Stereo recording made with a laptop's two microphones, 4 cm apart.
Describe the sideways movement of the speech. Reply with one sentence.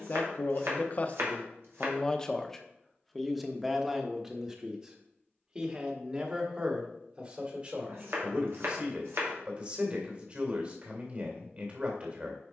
In this clip you hear the speech move from left to right.